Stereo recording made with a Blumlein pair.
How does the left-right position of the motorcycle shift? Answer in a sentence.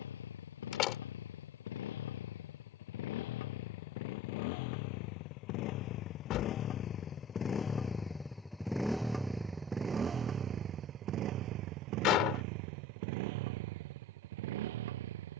In this clip you hear the motorcycle move from left to right.